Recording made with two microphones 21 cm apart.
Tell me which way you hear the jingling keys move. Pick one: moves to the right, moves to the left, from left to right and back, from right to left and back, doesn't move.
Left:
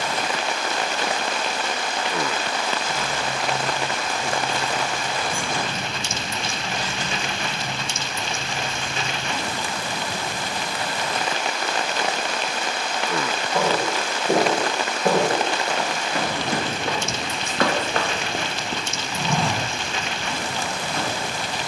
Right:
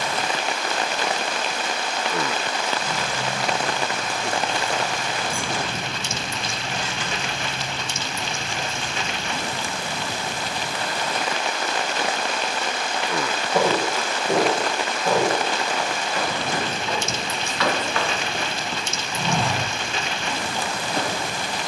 moves to the left.